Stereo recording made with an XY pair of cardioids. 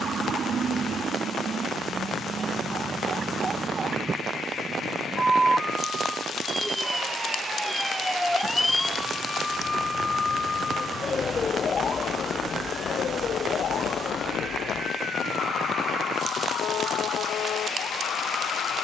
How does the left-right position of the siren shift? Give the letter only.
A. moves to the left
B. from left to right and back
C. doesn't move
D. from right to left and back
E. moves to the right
A.